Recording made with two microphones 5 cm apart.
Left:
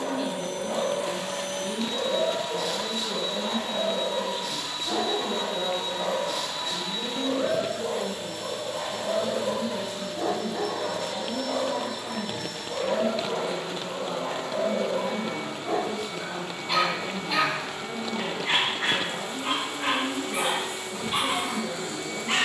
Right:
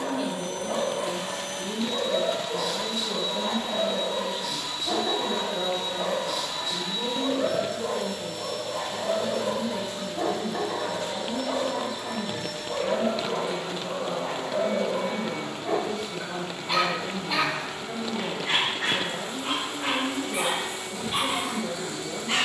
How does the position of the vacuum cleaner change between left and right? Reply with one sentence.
You can hear the vacuum cleaner go right and come back.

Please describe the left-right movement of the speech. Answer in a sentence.
In this clip you hear the speech stay in one place.